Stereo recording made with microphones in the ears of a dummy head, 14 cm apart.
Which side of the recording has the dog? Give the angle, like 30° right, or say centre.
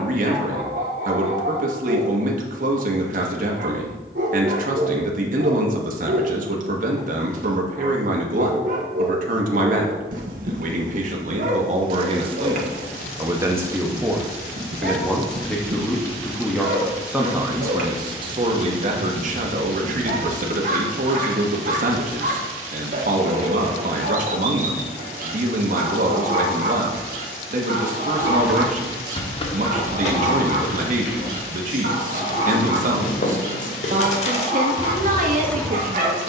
60° right.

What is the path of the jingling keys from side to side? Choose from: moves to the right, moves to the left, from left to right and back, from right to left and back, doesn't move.
from right to left and back.